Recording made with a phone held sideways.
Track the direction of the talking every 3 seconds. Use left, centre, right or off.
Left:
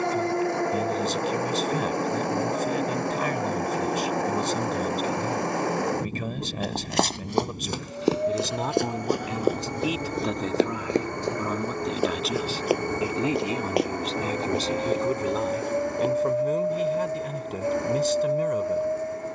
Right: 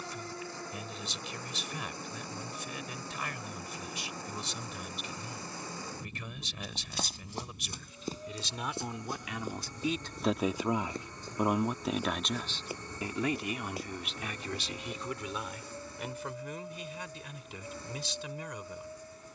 left, left, left, centre, left, left, left.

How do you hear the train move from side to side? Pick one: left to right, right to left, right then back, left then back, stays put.
stays put.